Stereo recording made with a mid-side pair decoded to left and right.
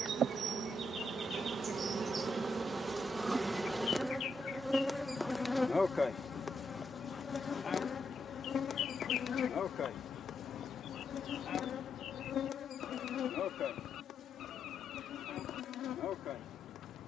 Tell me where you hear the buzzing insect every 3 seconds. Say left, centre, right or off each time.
right, centre, left, left, left, left.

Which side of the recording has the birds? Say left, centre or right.
left.